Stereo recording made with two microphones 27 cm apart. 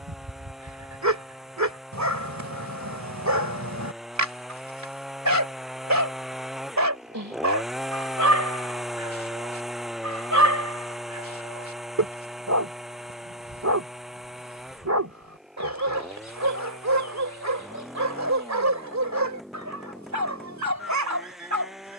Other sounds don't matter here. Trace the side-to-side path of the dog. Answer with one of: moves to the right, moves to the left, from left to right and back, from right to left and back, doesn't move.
doesn't move.